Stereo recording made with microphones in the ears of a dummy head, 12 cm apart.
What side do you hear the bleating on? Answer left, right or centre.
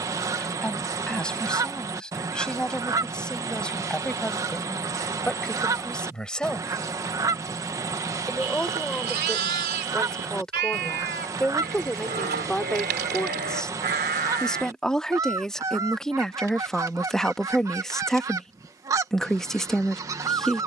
right.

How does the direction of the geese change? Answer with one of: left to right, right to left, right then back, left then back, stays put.
stays put.